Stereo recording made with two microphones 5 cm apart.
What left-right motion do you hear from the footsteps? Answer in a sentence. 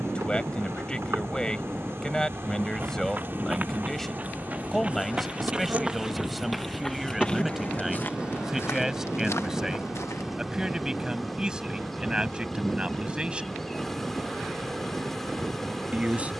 In this clip you hear the footsteps go from the right side to the left.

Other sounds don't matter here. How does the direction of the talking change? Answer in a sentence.
In this clip you hear the talking move to the right.